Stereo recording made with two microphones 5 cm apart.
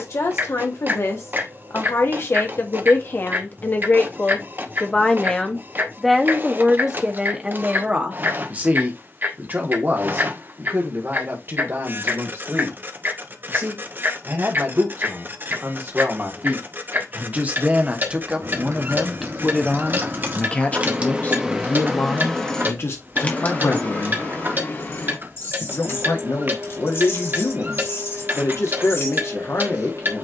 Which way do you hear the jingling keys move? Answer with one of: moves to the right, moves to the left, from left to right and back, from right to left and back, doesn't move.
moves to the left.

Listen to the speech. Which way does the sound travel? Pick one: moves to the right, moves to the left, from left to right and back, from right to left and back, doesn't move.
from left to right and back.